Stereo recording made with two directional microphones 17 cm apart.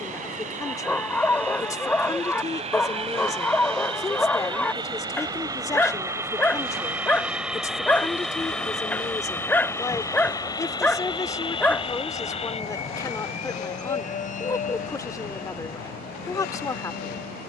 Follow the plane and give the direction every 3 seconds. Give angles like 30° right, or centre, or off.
40° right, 30° right, centre, 20° left, 40° left, 50° left.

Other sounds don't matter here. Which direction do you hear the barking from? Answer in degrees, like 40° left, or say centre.
10° left.